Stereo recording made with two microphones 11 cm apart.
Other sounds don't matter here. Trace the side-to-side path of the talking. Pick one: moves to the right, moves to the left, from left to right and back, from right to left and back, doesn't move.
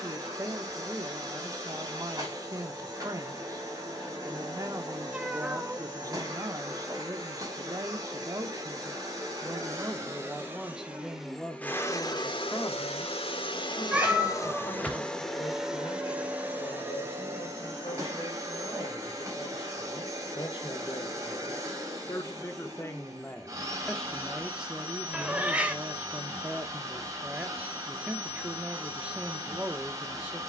from right to left and back.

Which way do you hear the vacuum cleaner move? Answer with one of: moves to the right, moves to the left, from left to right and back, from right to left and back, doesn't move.
from right to left and back.